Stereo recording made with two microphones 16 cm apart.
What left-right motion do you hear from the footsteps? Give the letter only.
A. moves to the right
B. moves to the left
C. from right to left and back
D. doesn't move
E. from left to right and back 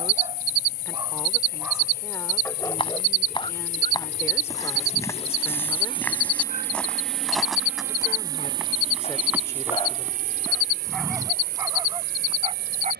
A.